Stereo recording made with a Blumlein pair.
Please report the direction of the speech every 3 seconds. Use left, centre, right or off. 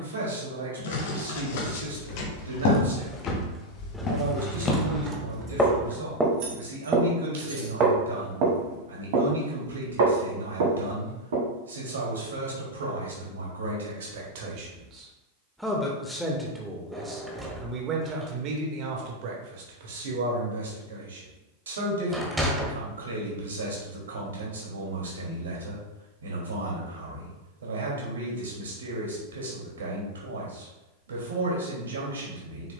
right, right, right, right, right, centre, right, right, right, right, right.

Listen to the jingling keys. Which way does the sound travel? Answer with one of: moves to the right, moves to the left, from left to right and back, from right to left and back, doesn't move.
moves to the right.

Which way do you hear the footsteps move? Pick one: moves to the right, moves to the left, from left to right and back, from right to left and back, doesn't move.
moves to the right.